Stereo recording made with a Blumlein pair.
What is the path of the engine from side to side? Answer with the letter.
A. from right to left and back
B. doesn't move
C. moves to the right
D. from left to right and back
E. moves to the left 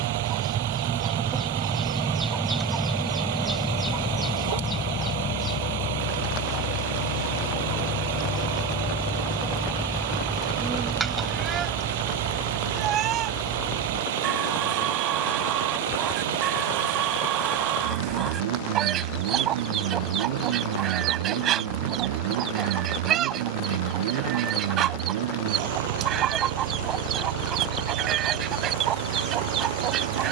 B.